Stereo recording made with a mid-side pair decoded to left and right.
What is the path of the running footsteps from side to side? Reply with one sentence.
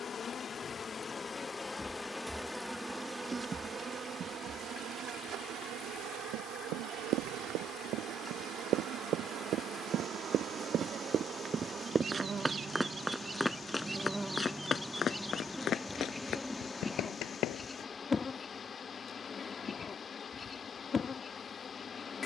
You can hear the running footsteps move from right to left.